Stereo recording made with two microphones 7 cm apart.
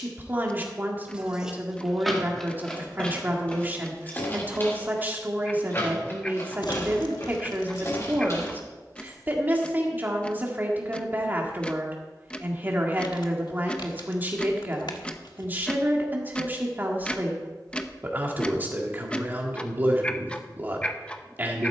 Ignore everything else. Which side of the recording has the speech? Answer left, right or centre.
right.